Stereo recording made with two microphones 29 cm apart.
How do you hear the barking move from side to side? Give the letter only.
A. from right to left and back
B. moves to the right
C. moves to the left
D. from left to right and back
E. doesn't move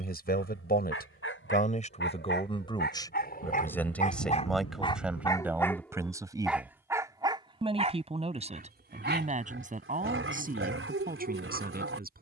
B.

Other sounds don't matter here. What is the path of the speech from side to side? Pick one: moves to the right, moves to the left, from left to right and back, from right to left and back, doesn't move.
moves to the right.